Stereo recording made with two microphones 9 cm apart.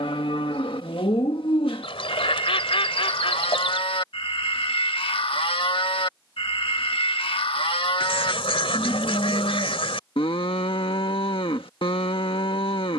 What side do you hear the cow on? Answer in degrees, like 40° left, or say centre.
70° left.